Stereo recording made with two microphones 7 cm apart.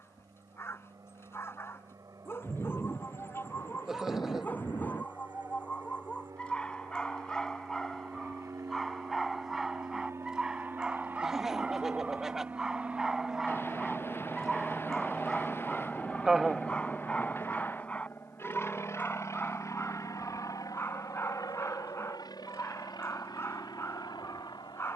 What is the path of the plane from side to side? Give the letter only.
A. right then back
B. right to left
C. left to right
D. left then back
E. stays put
B.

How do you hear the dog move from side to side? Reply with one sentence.
In this clip you hear the dog go right and come back.